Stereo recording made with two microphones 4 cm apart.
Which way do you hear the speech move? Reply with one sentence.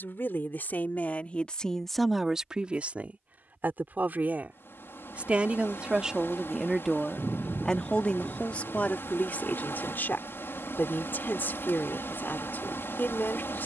You can hear the speech move from left to right and back again.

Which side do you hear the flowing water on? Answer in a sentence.
You can hear the flowing water on the left.